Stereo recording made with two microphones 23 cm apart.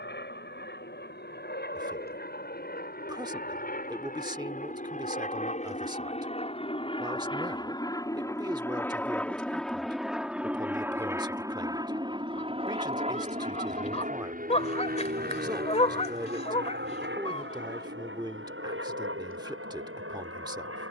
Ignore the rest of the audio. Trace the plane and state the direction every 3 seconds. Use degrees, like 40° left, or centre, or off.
50° left, 40° left, 20° left, 10° right, 30° right, 50° right, 60° right.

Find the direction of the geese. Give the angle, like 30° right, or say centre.
30° left.